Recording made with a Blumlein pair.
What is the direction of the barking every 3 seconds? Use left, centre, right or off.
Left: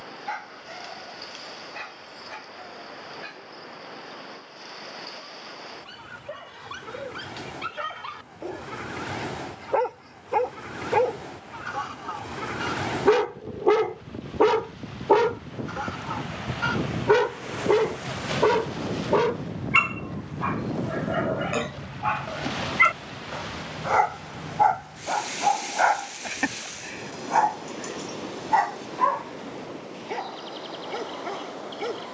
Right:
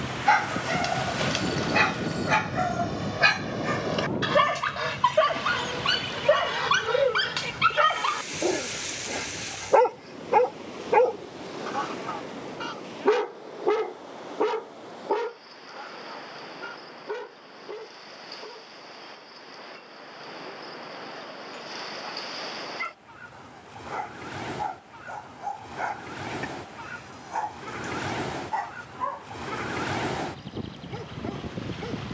right, right, right, centre, centre, left, left, left, left, left, left.